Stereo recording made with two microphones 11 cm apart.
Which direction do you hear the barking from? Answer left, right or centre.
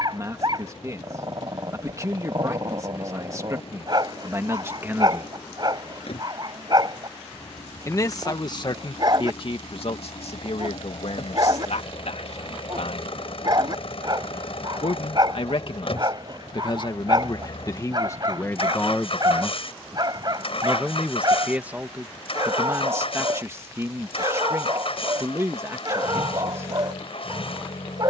right.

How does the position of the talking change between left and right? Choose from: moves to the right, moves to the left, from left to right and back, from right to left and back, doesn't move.
from right to left and back.